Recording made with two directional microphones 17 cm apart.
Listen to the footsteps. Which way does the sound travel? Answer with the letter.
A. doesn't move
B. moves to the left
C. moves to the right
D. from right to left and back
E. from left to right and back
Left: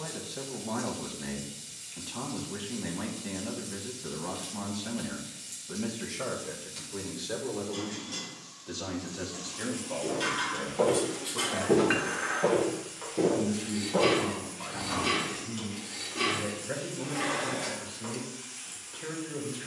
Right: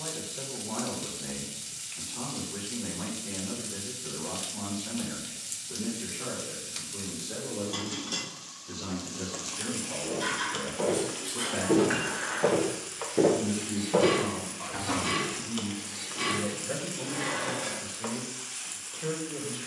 C.